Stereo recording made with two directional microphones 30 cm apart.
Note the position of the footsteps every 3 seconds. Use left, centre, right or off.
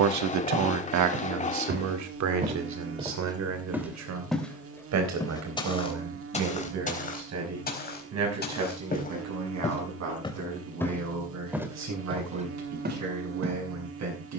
right, centre, left, centre, right.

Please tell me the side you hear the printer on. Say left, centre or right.
left.